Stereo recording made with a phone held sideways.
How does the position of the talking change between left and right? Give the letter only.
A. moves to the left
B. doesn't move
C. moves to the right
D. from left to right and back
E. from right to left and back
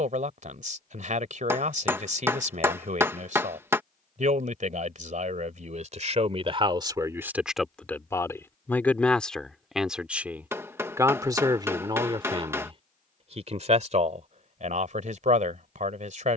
E.